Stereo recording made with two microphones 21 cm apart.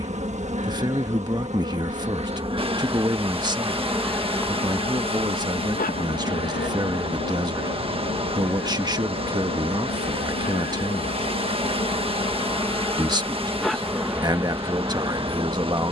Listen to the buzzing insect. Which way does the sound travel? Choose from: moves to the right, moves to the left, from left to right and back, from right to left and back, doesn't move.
from right to left and back.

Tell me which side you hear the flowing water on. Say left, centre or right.
right.